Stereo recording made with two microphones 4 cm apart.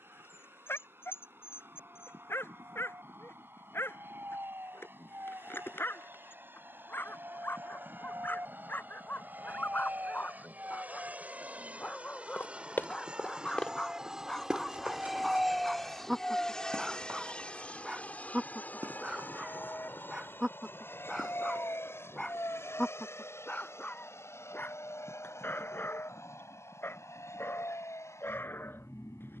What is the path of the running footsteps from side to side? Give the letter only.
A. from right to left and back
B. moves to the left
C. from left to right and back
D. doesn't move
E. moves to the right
E.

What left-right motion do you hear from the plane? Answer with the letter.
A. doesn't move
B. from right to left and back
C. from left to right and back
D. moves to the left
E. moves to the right
D.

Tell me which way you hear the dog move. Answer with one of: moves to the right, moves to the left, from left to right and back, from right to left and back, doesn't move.
from left to right and back.